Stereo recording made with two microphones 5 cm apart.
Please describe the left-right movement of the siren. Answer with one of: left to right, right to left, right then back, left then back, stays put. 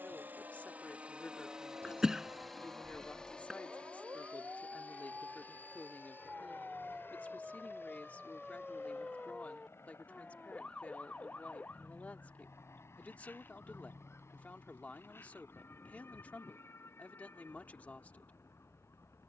right to left.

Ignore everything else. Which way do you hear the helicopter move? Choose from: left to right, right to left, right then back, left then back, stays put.
right to left.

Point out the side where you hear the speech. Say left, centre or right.
left.